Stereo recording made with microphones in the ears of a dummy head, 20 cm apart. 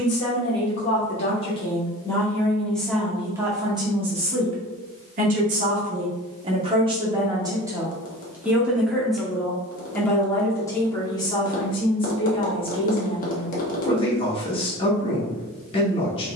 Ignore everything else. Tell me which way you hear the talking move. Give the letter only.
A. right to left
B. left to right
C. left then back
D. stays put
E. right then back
E.